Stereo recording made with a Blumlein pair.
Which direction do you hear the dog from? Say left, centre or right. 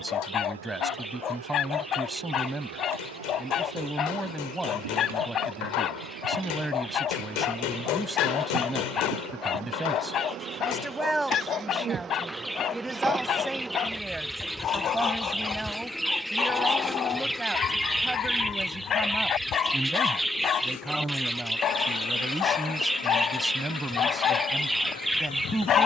left.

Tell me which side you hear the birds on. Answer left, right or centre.
centre.